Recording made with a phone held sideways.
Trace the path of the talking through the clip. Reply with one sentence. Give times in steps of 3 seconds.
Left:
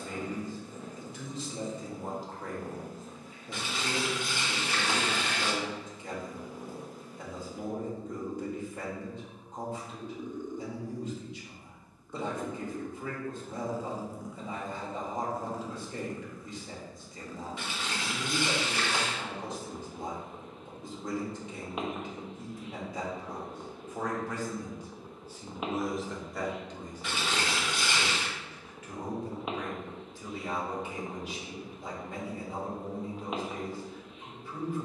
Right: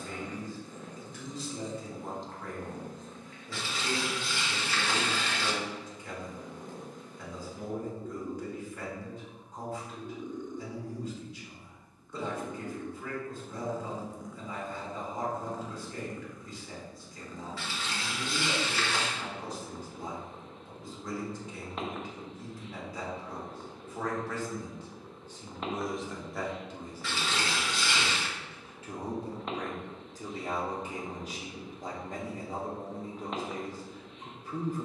You can hear the talking on the left from 0 s, in the centre from 24 s and on the right from 27 s.